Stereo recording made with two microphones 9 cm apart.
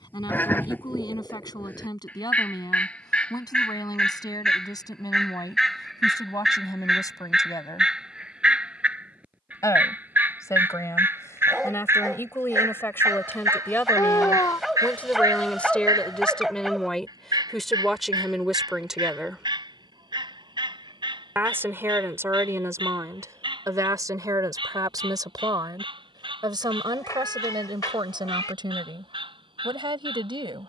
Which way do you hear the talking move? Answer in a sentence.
In this clip you hear the talking move to the right.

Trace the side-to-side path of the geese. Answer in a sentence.
In this clip you hear the geese move from left to right.